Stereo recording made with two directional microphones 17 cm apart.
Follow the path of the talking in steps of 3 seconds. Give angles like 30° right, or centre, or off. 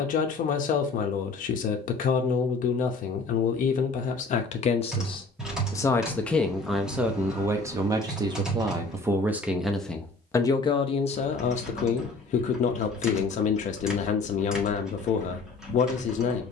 50° left, 40° left, 10° right, 20° left, 40° left, 40° left.